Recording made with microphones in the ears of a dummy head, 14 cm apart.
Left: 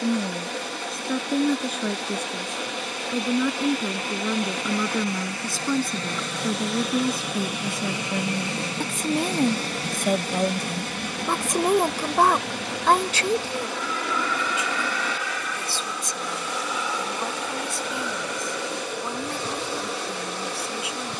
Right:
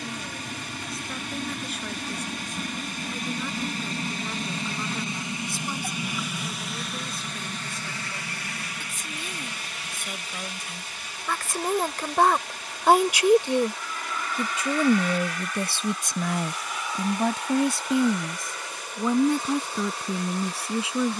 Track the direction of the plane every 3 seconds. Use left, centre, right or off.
right, right, centre, left, left, left, left.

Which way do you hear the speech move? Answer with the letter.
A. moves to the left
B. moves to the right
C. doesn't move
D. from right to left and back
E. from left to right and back
B.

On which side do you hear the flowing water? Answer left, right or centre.
left.